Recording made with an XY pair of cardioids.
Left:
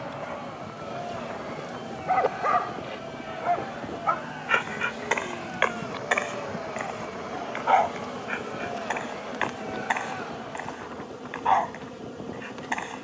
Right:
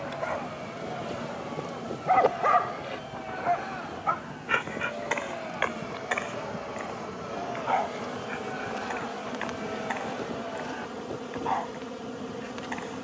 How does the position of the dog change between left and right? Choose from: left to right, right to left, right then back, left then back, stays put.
right to left.